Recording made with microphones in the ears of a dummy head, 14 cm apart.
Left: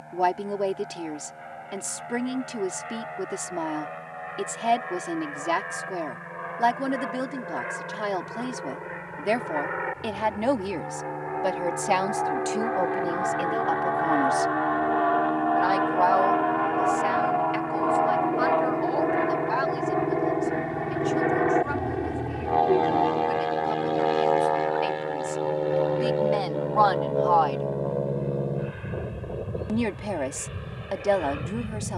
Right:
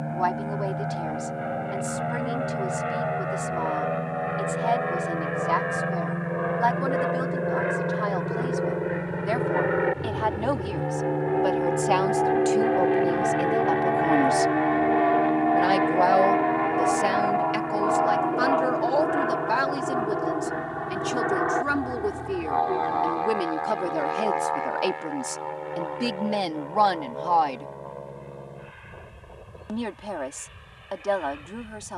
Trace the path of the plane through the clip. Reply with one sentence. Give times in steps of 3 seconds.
In this clip you hear the plane on the right from 0 s, in the centre from 15 s and on the left from 21 s.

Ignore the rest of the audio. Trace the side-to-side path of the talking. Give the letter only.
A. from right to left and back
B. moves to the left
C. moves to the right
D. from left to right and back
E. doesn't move
D.